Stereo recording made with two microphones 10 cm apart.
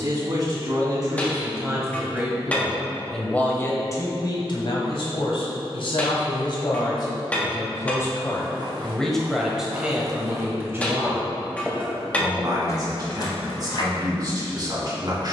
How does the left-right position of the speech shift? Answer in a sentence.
In this clip you hear the speech go left and come back.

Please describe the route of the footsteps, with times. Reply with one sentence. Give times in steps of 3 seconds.
In this clip you hear the footsteps not at all from 0 s, on the right from 6 s and on the left from 12 s.